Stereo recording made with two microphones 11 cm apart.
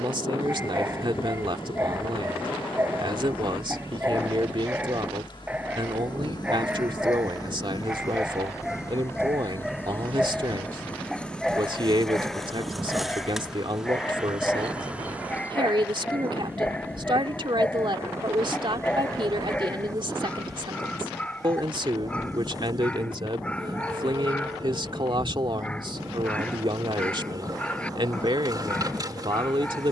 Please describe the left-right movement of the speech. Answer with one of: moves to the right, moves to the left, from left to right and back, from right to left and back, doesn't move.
doesn't move.